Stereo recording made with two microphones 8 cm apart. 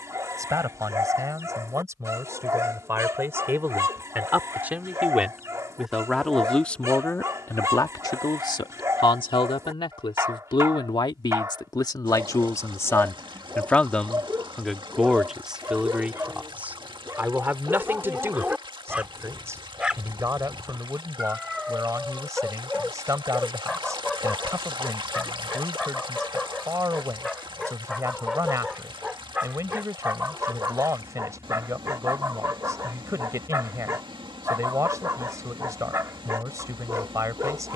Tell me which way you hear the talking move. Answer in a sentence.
In this clip you hear the talking move from right to left and back again.